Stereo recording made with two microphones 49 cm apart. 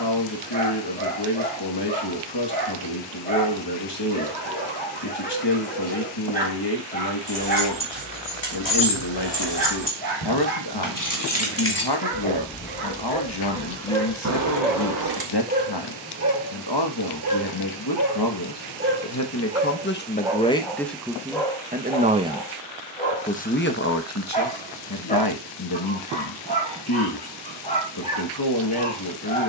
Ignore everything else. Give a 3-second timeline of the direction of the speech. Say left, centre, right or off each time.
left, left, left, left, left, left, left, centre, left, left.